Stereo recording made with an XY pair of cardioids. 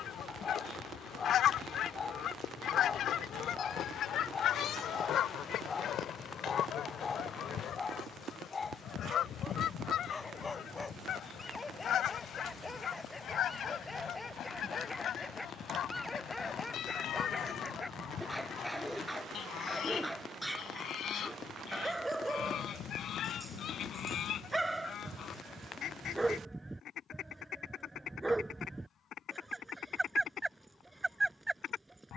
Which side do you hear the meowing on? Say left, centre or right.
left.